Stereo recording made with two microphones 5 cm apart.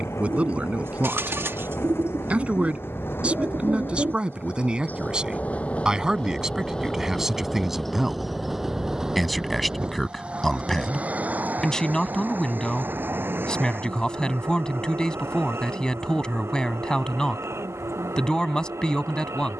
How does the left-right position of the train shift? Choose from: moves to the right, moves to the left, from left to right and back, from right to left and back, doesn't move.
moves to the right.